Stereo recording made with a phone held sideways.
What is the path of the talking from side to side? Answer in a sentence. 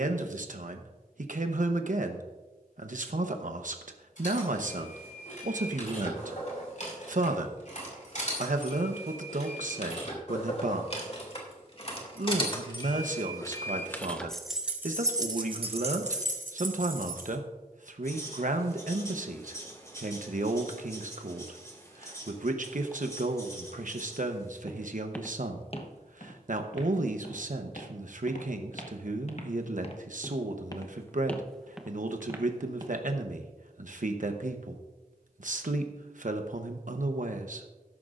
You can hear the talking stay in one place.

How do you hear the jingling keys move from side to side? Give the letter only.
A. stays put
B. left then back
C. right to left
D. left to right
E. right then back
D.